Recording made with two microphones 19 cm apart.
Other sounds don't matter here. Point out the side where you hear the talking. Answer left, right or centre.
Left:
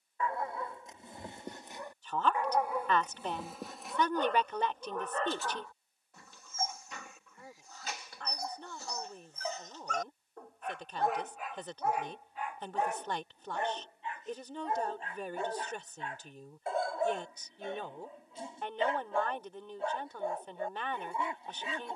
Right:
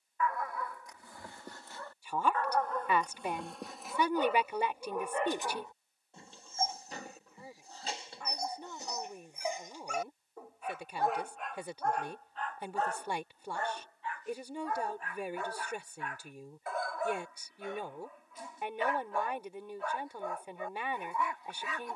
centre.